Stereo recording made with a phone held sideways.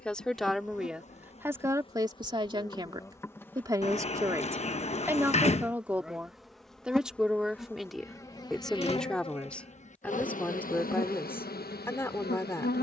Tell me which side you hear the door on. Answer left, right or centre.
left.